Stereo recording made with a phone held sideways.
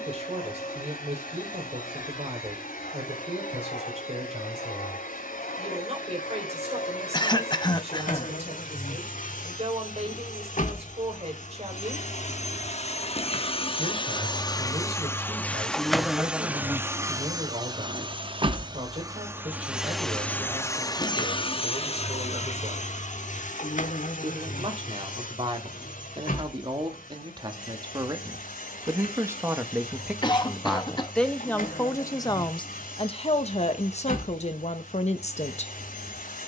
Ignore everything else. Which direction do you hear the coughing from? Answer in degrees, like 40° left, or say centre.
30° left.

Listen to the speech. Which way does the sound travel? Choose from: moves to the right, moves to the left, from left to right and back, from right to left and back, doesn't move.
moves to the left.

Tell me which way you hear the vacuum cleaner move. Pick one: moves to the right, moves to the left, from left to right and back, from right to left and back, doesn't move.
from left to right and back.